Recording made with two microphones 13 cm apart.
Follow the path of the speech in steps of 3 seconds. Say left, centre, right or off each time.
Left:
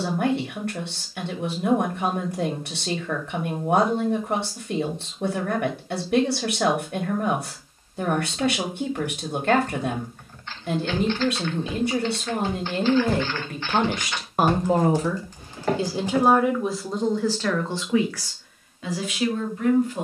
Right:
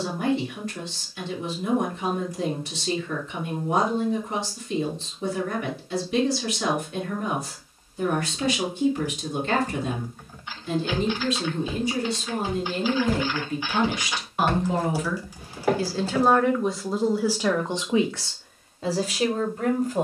left, left, left, left, left, centre, right.